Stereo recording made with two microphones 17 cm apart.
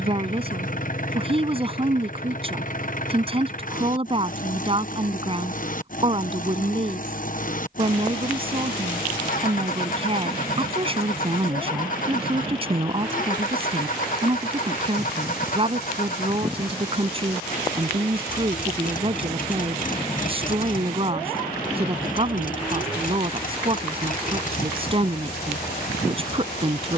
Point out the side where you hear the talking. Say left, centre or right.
right.